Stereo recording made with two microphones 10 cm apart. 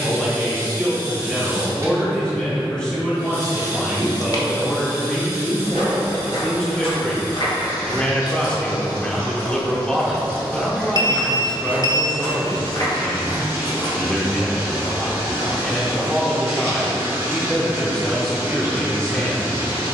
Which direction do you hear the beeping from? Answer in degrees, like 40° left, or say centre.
40° left.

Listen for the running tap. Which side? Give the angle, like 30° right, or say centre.
30° right.